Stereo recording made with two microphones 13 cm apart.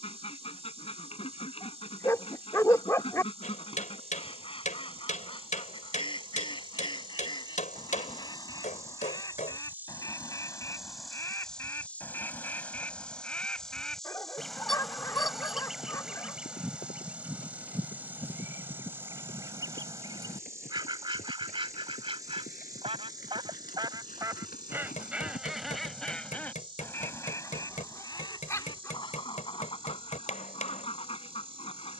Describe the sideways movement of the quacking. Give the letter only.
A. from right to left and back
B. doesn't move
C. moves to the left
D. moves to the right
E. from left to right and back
E.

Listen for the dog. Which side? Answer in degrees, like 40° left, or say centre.
20° left.